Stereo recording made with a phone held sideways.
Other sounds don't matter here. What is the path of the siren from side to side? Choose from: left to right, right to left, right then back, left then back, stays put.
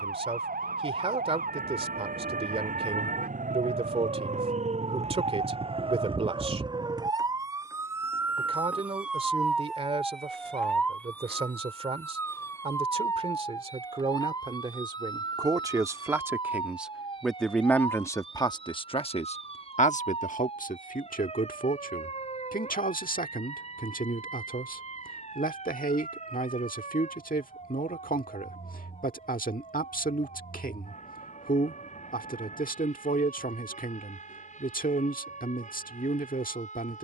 right to left.